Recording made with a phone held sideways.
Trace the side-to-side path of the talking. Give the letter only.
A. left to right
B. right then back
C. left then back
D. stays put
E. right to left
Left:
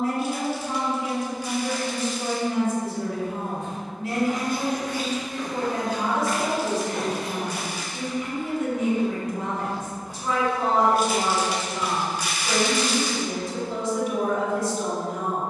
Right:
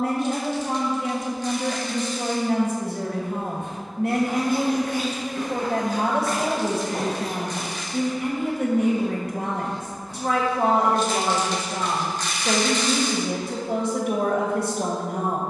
D.